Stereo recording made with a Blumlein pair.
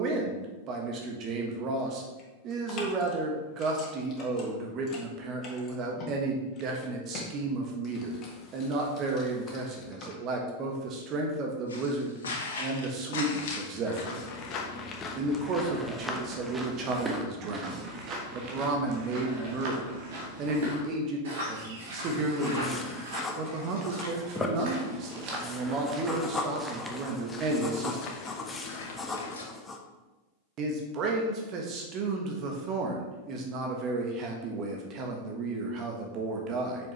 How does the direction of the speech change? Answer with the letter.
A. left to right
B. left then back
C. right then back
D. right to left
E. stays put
E.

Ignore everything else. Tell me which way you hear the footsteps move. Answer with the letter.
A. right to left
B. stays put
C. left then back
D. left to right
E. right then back
E.